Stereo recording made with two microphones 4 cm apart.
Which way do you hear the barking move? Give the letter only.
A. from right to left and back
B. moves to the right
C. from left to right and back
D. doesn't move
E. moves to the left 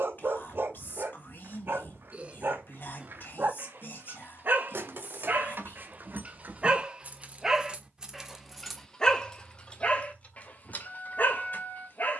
E.